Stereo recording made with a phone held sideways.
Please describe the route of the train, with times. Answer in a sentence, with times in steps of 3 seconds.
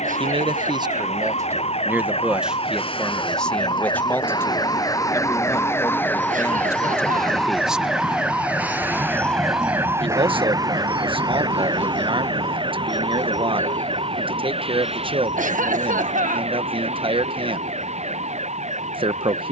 You can hear the train on the left from 0 s and on the right from 9 s.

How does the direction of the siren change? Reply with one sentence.
You can hear the siren move from left to right.